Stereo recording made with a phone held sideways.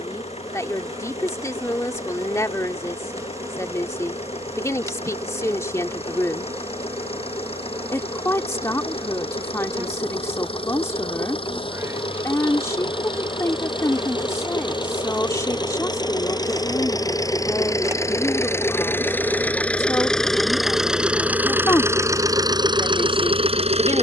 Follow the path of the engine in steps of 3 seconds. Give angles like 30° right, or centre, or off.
50° left, 50° left, 50° left, 40° left, 40° left, 30° left, 10° left, 30° right.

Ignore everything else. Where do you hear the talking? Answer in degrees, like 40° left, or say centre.
20° left.